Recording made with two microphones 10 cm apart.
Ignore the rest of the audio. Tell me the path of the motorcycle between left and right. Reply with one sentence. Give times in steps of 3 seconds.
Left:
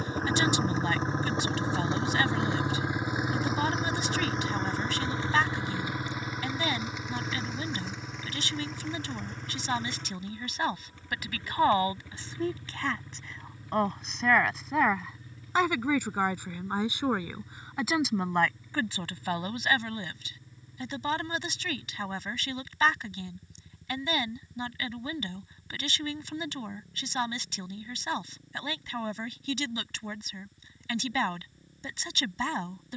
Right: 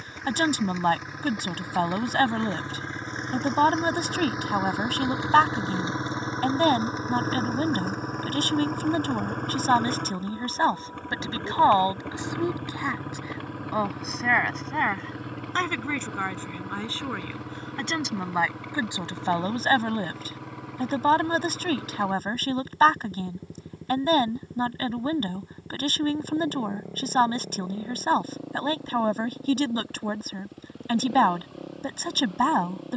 In this clip you hear the motorcycle on the left from 0 s, in the centre from 3 s and on the right from 6 s.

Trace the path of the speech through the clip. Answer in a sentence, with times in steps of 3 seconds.
You can hear the speech on the right from 0 s, in the centre from 12 s and on the right from 18 s.